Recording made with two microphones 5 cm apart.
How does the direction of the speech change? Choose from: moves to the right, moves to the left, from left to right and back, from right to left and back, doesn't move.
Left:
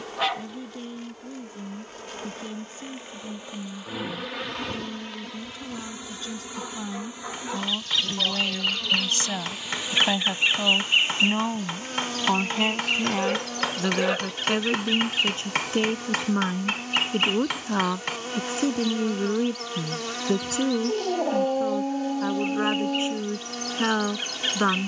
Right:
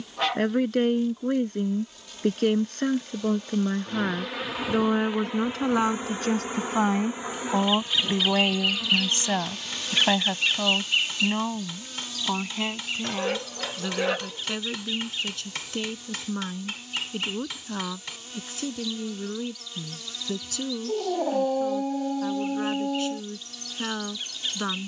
moves to the left.